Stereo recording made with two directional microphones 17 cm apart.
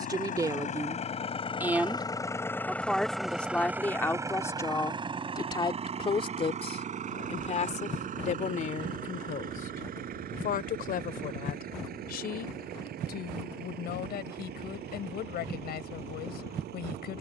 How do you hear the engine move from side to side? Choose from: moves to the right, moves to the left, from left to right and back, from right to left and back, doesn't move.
moves to the right.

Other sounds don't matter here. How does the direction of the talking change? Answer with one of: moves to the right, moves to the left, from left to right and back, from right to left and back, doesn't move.
moves to the left.